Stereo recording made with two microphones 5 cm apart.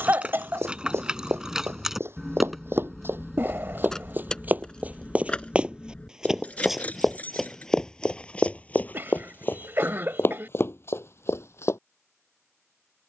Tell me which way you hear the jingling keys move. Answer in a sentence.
In this clip you hear the jingling keys travel towards the left.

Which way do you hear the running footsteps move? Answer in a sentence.
You can hear the running footsteps go from the right side to the left.